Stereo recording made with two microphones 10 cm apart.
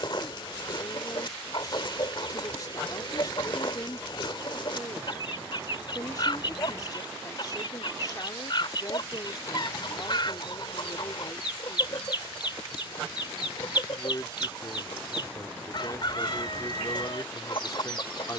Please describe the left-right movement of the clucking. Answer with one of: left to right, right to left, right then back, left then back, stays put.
stays put.